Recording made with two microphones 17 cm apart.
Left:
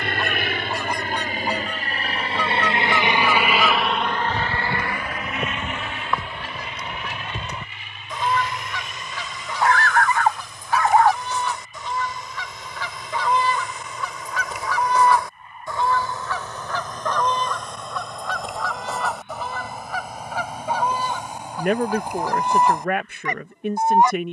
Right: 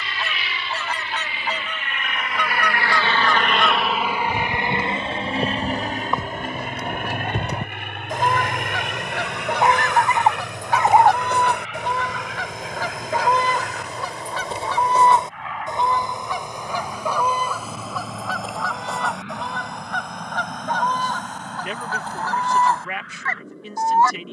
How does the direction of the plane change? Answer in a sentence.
You can hear the plane go from the left side to the right.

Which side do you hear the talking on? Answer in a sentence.
In this clip you hear the talking on the left.